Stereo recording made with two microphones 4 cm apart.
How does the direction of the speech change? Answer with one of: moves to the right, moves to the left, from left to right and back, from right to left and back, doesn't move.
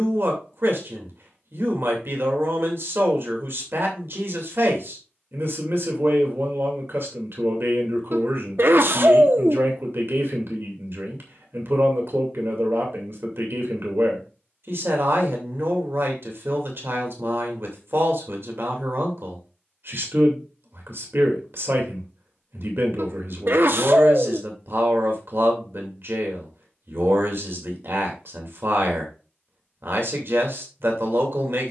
doesn't move.